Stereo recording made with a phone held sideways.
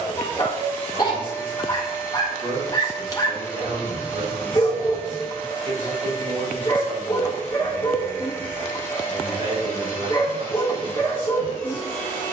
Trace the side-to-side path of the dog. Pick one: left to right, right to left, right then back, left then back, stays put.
stays put.